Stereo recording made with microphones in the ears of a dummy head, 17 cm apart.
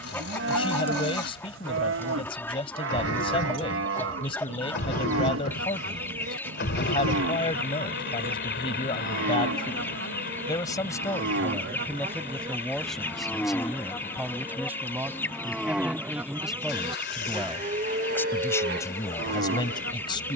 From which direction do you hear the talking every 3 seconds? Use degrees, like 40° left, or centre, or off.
30° left, 30° left, 30° left, 20° left, centre, centre, 20° left.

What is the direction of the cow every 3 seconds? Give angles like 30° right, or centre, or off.
70° right, 70° right, 70° right, 60° right, centre, 20° right, 60° right.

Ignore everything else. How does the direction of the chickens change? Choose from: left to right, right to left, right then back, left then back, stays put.
stays put.